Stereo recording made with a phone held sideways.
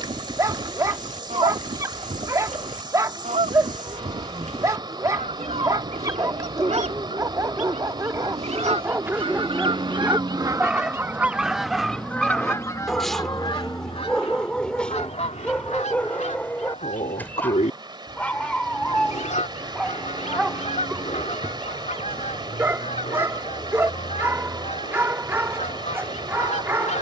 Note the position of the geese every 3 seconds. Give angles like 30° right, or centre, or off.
60° right, 60° right, 60° right, 20° right, 30° left, 60° left, 60° left, 60° left, 60° left.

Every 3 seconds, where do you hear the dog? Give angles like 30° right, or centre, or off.
20° right, 20° right, 20° right, 10° right, centre, 10° left, centre, 20° right, 20° right.